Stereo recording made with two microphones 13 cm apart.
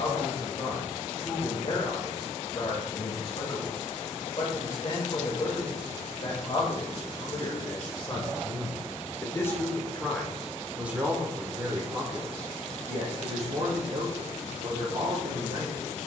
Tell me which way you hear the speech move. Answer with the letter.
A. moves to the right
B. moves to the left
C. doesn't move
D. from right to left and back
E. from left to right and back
A.